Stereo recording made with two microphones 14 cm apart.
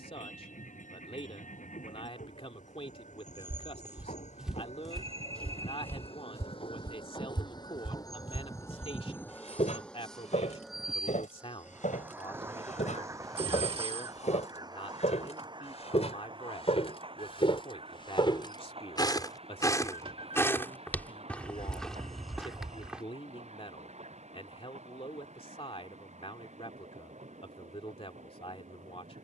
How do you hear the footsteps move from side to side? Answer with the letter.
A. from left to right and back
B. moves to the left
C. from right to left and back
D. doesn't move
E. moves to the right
C.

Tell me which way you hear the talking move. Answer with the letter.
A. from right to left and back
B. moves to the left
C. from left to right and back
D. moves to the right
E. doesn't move
E.